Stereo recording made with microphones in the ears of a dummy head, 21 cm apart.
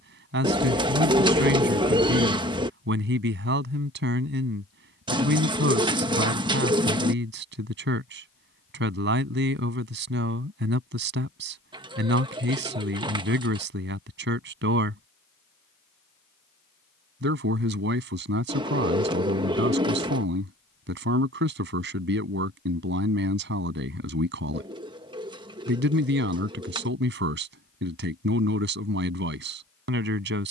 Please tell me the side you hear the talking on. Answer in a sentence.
In this clip you hear the talking on the right.